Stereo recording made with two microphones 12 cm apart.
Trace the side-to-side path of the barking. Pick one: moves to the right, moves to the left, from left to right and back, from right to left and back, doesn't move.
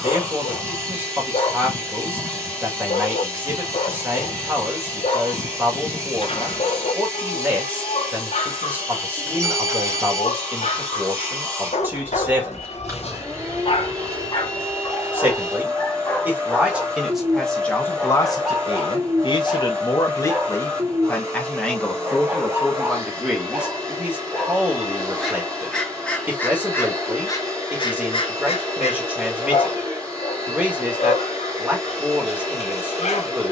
from left to right and back.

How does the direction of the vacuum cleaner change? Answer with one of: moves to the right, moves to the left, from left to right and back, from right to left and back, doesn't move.
doesn't move.